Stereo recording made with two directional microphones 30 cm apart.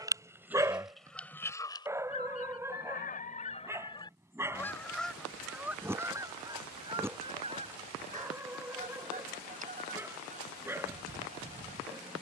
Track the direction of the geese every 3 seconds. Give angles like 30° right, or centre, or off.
10° left, 10° left, 20° right, 20° right.